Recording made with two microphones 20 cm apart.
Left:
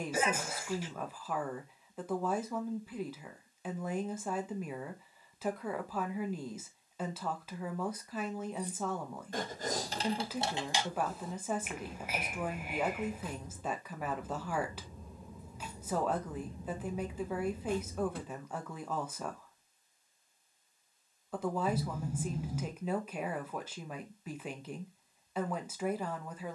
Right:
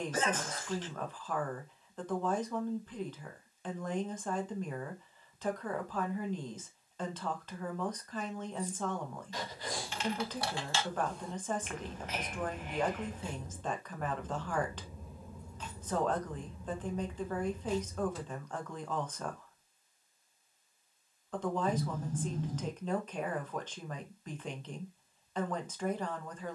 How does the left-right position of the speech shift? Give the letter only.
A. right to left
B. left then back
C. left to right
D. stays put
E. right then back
D.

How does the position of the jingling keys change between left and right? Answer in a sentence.
In this clip you hear the jingling keys go right and come back.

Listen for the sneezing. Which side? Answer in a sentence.
You can hear the sneezing in the centre.